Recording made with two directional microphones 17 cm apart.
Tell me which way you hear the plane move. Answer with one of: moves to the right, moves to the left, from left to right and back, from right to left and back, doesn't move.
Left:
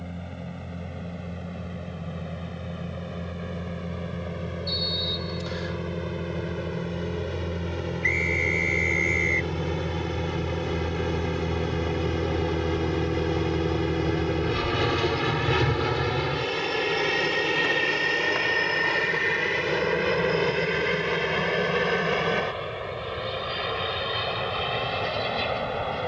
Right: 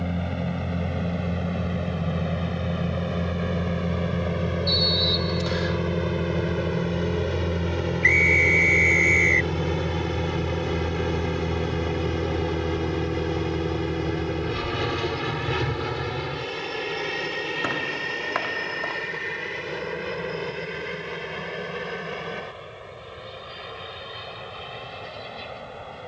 moves to the left.